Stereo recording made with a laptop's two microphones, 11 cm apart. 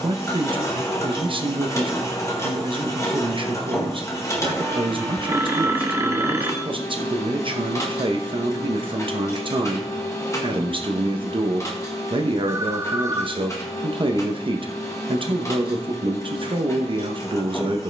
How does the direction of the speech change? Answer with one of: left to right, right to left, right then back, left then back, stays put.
stays put.